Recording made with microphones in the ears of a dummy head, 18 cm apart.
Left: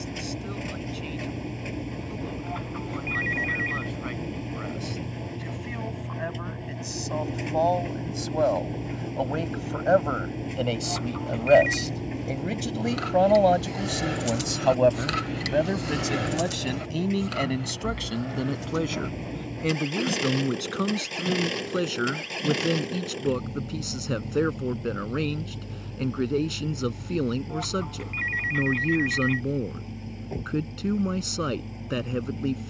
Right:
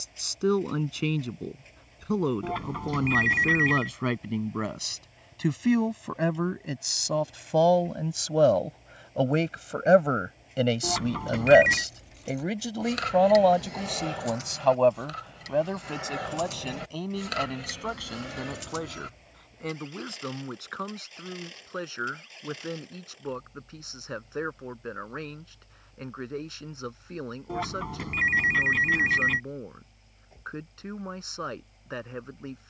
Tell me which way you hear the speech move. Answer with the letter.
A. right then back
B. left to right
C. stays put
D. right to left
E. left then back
D.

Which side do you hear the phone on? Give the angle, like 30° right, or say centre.
50° right.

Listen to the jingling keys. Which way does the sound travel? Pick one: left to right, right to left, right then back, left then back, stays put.
left then back.